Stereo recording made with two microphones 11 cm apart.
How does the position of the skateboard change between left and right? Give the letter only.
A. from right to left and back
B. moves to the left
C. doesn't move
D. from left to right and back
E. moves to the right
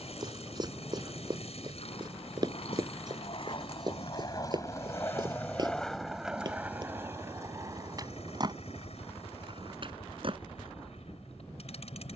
E.